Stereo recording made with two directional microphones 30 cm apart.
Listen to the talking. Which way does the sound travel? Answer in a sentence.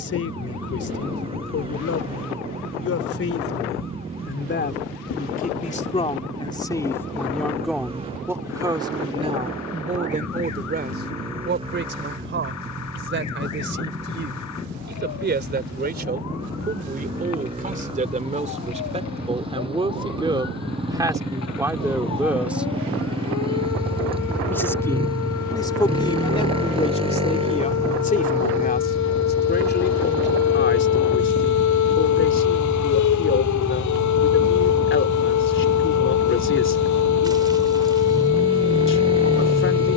In this clip you hear the talking move from left to right and back again.